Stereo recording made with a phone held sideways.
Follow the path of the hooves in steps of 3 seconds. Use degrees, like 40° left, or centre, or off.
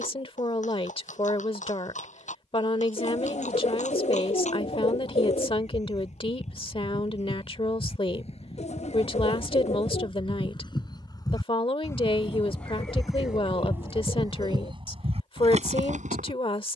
60° left, 50° left, 50° left, 30° left, 10° right, 50° right.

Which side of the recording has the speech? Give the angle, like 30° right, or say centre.
40° left.